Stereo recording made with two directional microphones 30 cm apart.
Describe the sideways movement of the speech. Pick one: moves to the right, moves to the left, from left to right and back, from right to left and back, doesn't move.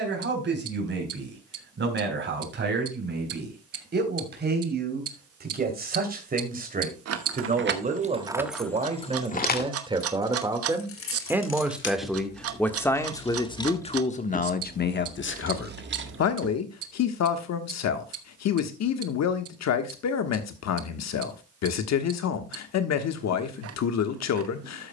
moves to the left.